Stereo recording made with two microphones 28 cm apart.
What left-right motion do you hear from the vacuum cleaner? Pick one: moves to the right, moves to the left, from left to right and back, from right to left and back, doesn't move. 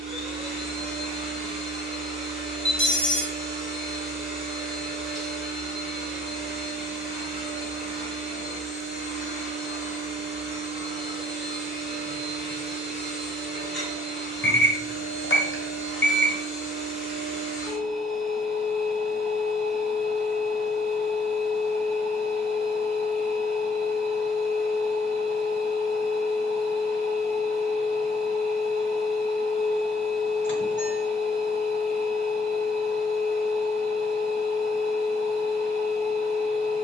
doesn't move.